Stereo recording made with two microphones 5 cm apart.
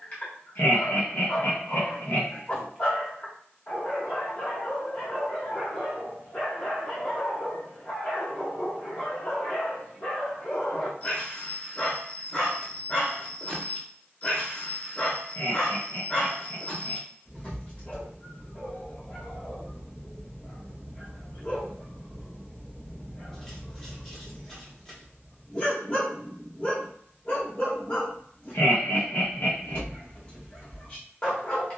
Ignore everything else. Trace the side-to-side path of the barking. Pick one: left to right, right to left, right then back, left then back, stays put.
stays put.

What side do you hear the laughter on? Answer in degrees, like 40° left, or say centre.
50° left.